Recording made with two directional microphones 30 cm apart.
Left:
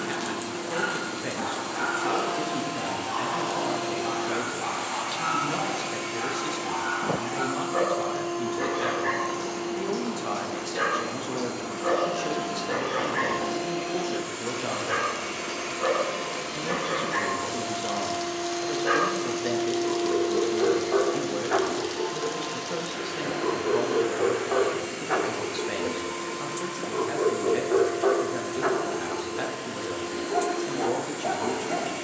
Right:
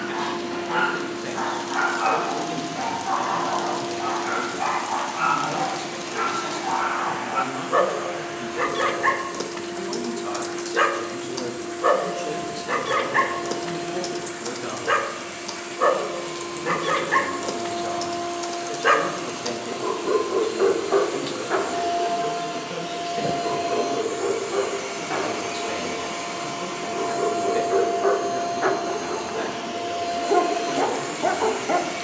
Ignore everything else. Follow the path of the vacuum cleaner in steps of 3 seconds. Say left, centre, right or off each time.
left, left, left, left, left, left, centre, right, right, right, right.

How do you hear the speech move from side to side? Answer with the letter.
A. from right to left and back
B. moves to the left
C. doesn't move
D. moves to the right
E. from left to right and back
C.